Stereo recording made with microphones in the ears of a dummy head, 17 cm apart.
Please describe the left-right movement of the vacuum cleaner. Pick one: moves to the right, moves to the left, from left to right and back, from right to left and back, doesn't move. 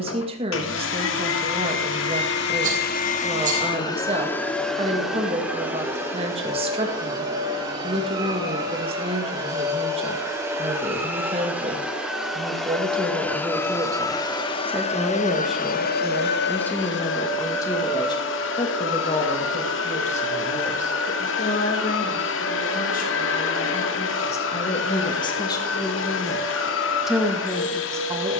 from left to right and back.